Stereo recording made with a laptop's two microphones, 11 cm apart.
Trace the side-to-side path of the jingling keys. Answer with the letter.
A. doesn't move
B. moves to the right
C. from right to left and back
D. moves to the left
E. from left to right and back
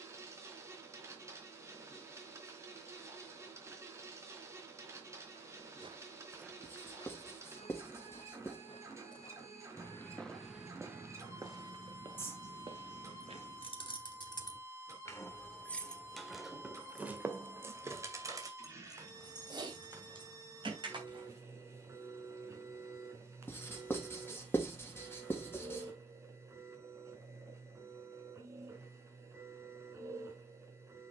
B.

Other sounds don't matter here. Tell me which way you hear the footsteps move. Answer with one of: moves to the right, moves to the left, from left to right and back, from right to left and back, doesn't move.
from right to left and back.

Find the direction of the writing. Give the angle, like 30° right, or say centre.
20° left.